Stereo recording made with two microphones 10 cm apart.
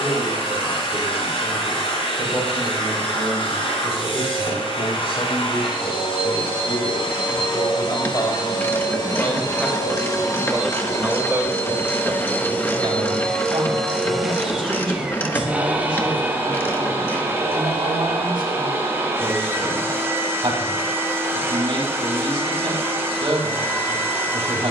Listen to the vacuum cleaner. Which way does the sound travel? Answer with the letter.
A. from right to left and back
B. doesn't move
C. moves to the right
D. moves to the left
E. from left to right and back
C.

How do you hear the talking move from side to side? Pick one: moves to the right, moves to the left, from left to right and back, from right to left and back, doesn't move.
moves to the right.